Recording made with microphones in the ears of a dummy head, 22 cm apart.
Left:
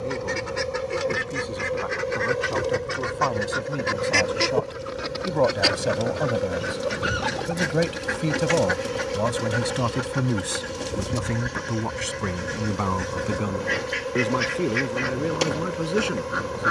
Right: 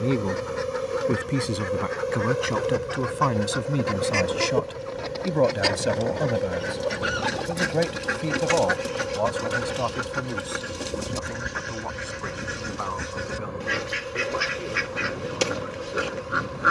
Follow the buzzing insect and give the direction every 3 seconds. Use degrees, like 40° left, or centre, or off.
20° right, centre, 20° left, 50° left, 60° left, 60° left.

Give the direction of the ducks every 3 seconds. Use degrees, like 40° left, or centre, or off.
40° left, 20° left, centre, 10° right, 10° right, 10° right.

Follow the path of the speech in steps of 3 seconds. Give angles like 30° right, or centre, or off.
40° right, 20° right, 10° left, 30° left, 50° left, 60° left.